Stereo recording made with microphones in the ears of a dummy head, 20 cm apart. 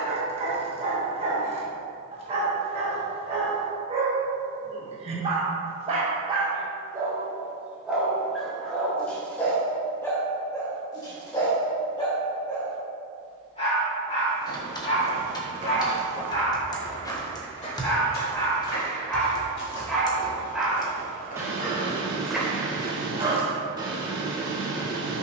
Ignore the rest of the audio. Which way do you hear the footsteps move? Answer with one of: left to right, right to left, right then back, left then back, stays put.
left then back.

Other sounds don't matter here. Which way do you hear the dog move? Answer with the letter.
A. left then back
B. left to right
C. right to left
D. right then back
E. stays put
A.